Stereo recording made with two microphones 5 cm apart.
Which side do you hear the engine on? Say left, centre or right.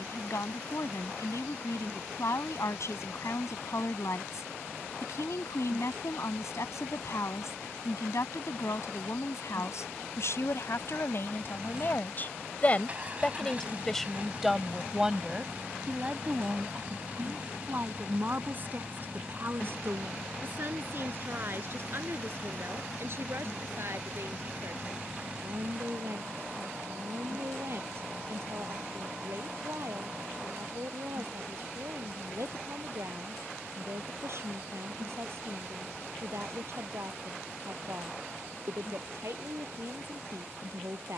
right.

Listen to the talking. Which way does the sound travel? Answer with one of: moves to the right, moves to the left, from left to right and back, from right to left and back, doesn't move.
moves to the right.